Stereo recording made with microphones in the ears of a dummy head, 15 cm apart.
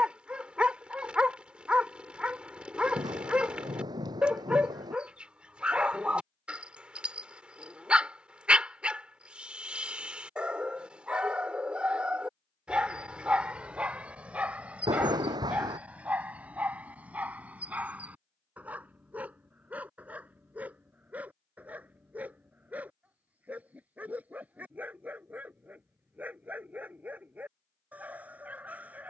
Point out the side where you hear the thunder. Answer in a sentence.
In this clip you hear the thunder on the right.